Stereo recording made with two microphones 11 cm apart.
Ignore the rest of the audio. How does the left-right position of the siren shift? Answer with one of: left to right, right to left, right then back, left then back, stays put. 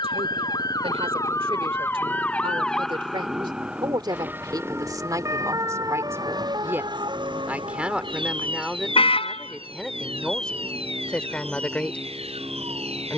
left to right.